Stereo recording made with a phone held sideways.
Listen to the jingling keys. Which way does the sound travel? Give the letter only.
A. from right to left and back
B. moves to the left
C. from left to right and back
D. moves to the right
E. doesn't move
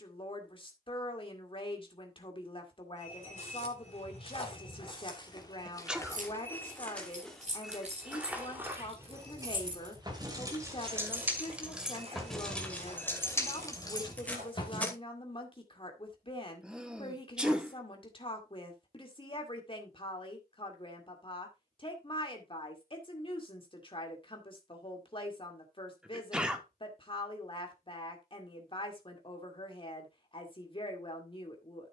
B.